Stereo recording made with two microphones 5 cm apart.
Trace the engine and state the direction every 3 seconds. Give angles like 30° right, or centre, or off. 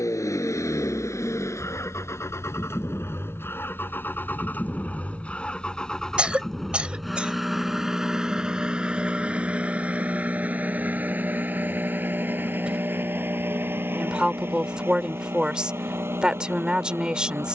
60° left, 30° left, 10° right, 30° right, 40° right, 50° right.